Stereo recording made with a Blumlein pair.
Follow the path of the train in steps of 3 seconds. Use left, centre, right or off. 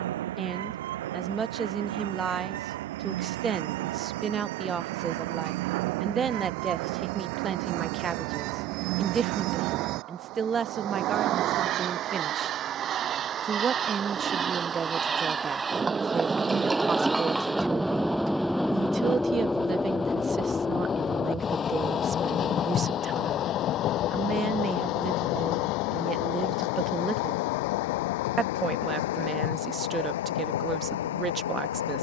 right, right, right, right, right, centre, centre, left, left, left, left.